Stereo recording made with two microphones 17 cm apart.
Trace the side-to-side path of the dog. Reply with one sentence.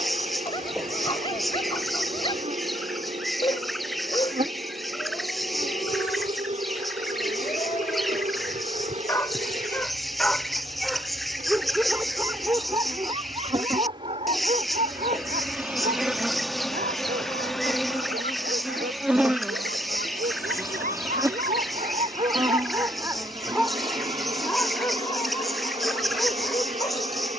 In this clip you hear the dog go right and come back.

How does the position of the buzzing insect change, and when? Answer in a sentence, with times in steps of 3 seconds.
In this clip you hear the buzzing insect on the right from 0 s, in the centre from 15 s and on the right from 21 s.